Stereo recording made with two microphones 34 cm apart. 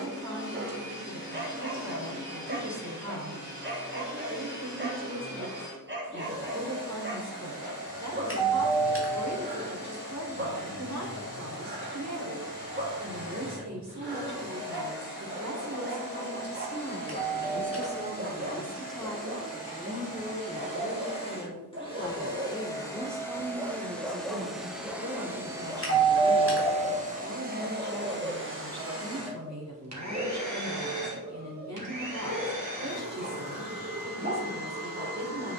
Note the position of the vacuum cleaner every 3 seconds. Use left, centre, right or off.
left, left, left, left, left, left, left, centre, centre, right, right, right.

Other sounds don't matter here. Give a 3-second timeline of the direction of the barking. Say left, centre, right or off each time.
right, right, right, right, right, right, right, right, centre, centre, right, right.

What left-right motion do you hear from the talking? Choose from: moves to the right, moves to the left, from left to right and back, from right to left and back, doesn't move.
from right to left and back.